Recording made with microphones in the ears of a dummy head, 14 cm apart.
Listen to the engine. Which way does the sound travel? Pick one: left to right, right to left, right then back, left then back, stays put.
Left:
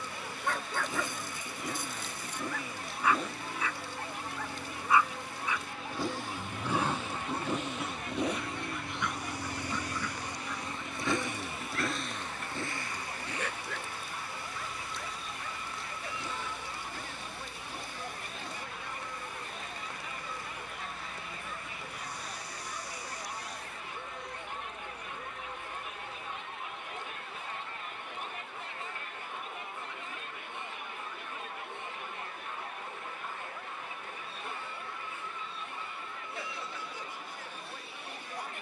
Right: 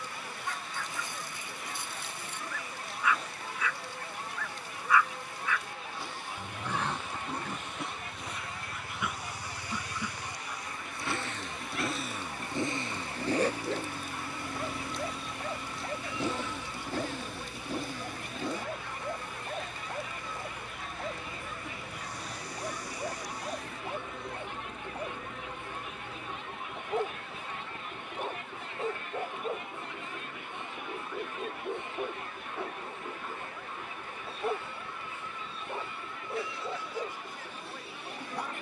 left to right.